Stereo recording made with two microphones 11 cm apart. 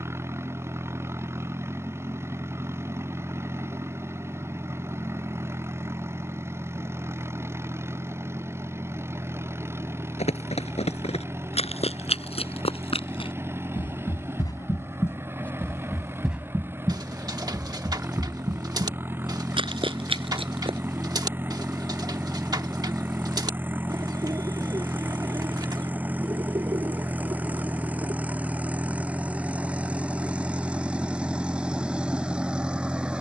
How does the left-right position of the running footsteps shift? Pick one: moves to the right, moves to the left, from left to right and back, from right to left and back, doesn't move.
moves to the right.